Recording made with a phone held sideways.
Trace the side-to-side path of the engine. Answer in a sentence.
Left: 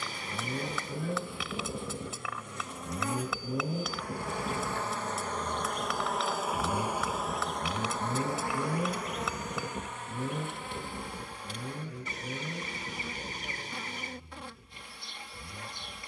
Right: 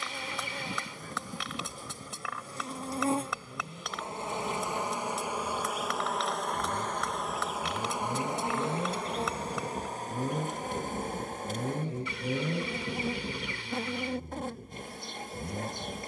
You can hear the engine go from the left side to the right.